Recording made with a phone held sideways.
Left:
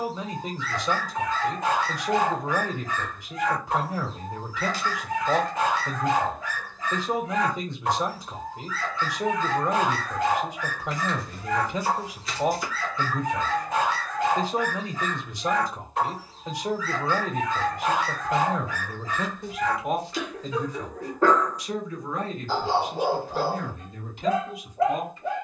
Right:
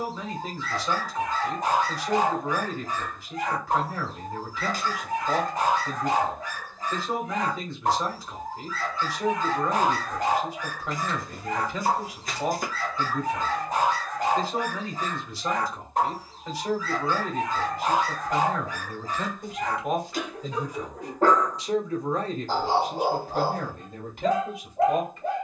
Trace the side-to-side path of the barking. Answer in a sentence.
You can hear the barking stay in one place.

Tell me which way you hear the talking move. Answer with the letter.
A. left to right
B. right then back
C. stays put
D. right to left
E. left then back
A.